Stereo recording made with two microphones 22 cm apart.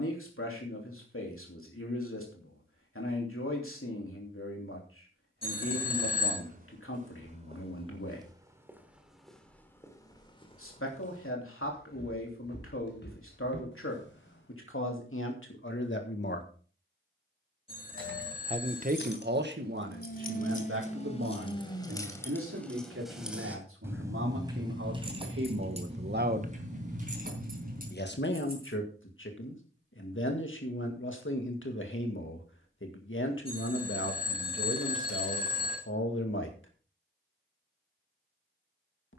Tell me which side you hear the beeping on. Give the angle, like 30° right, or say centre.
20° left.